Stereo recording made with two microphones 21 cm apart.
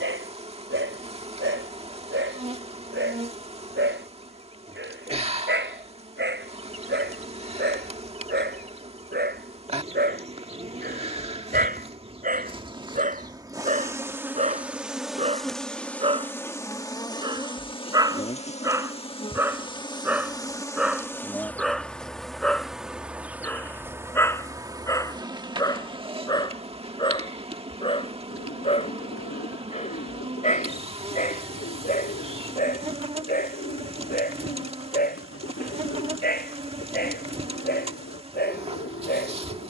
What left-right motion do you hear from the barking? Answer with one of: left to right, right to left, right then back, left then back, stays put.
right to left.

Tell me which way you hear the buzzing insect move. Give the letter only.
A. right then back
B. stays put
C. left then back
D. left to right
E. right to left
C.